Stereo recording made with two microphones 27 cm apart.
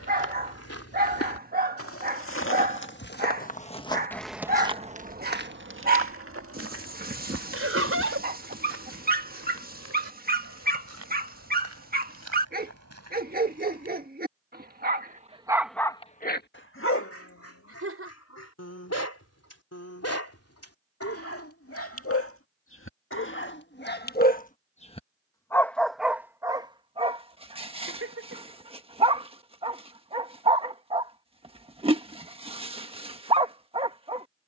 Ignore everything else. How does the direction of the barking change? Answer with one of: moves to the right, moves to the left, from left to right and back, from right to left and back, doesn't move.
from right to left and back.